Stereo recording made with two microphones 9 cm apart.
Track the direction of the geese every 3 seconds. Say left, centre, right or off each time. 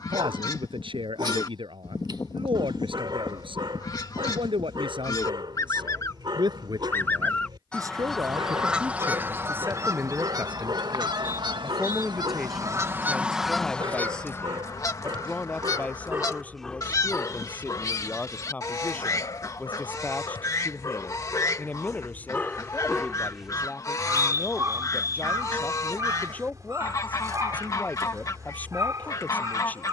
left, left, centre, right, centre, left, left, left, left, left.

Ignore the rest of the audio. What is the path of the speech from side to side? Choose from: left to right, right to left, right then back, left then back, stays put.
right to left.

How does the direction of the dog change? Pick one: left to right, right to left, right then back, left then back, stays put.
left then back.